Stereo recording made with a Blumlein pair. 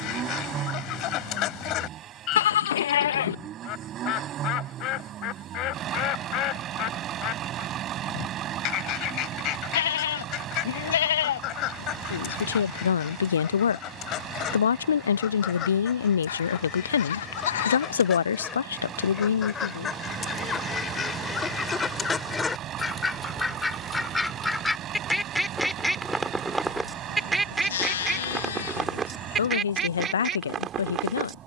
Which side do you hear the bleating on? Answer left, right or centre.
left.